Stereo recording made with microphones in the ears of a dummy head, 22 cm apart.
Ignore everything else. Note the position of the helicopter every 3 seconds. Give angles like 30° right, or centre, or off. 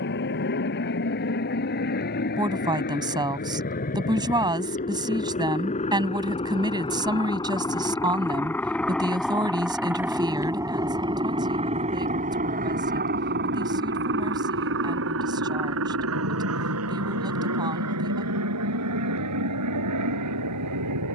50° left, 40° left, 20° left, 10° right, 40° right, 60° right, 70° right.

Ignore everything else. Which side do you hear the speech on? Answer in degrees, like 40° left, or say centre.
20° right.